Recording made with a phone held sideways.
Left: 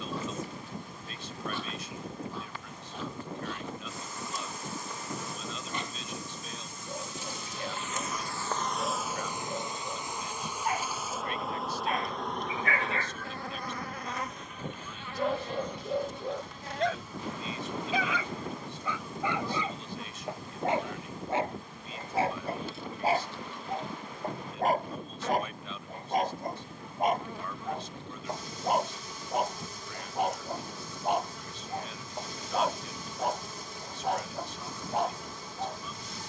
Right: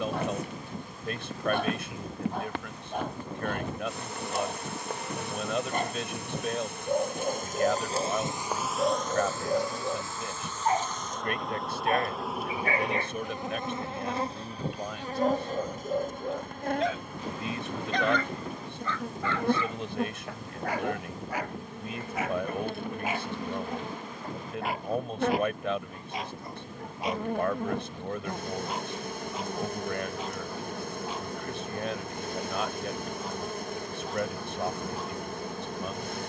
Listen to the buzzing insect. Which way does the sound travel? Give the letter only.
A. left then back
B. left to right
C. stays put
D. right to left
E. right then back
A.